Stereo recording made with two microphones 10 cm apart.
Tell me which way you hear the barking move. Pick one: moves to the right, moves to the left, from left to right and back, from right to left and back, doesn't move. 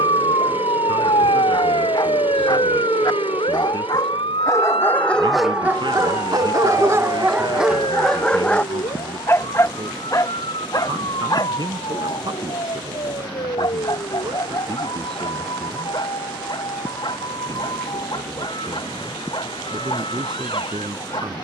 from left to right and back.